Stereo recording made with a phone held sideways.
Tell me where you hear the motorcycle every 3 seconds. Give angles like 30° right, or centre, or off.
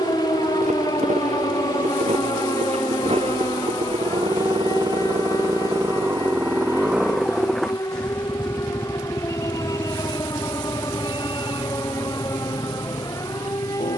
50° right, 30° right, centre, 30° left, 50° left.